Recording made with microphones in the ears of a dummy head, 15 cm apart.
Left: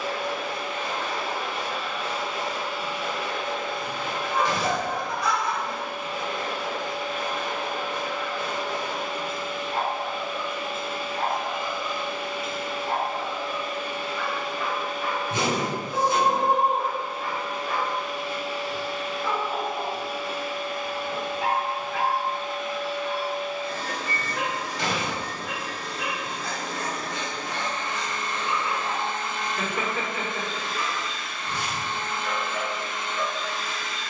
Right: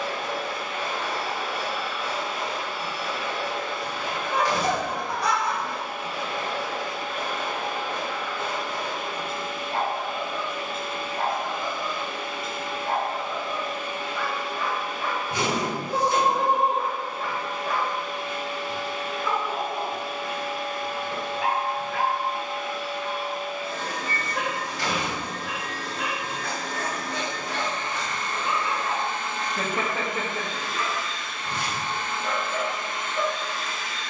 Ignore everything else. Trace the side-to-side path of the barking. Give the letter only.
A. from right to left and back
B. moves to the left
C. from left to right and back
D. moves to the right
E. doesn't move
E.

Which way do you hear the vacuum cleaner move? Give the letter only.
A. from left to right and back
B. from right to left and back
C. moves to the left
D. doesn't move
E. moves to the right
E.